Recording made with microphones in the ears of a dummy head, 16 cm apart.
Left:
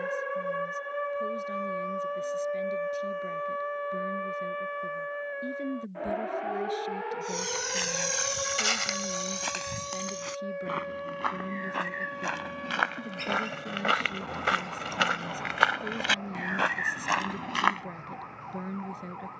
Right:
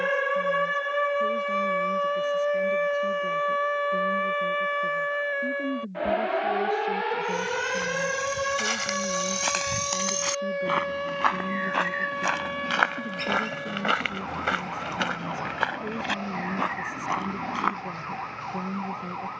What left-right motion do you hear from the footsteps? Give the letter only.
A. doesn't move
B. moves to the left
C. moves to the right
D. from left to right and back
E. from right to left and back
D.